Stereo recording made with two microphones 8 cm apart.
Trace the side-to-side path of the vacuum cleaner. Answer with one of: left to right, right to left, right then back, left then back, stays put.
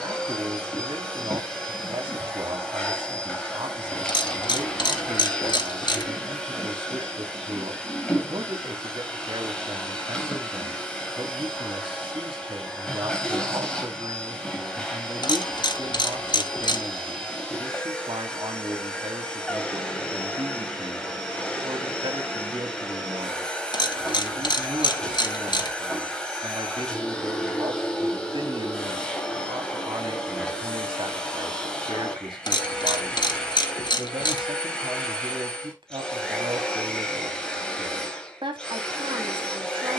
stays put.